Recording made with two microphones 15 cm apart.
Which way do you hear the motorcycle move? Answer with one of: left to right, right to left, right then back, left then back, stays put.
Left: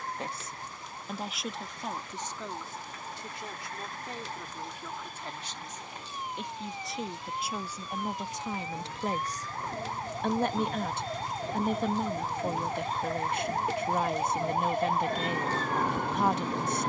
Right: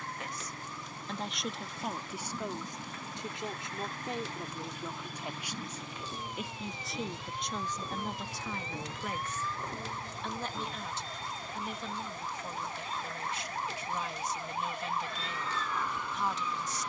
right to left.